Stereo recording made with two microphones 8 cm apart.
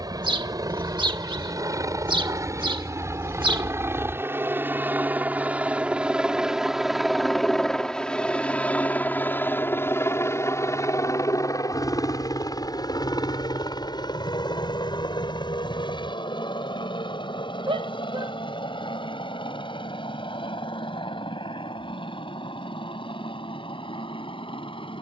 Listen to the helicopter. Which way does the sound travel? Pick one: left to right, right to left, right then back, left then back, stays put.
right to left.